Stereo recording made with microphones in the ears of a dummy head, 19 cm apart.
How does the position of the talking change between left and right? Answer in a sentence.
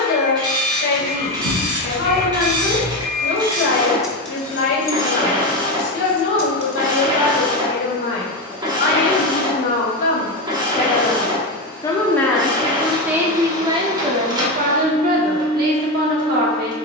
You can hear the talking move from left to right.